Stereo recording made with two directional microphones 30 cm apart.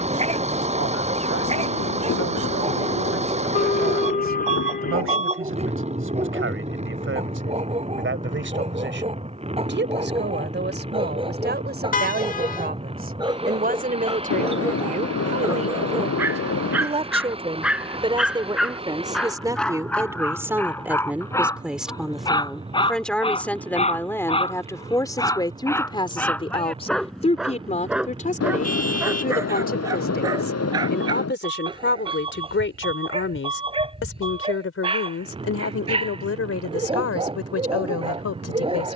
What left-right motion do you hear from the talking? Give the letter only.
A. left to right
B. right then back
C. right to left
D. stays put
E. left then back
C.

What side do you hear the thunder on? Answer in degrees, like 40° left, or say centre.
60° left.